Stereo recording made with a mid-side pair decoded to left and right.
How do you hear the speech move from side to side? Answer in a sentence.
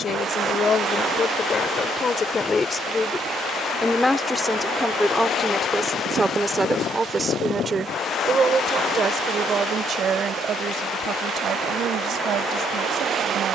In this clip you hear the speech move to the right.